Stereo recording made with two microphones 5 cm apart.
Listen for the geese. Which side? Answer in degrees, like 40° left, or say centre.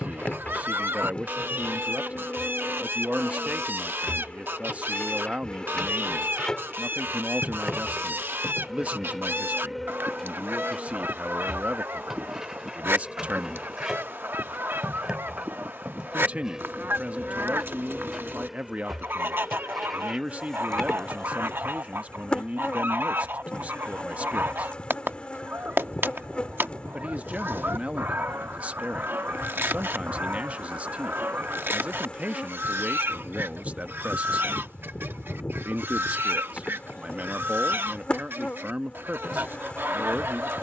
50° right.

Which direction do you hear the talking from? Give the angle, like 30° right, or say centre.
30° right.